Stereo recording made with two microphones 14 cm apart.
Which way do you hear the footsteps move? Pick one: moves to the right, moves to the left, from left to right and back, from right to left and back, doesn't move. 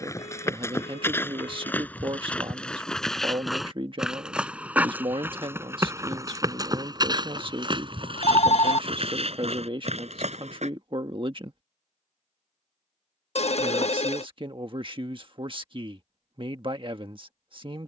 moves to the right.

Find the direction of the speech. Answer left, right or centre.
right.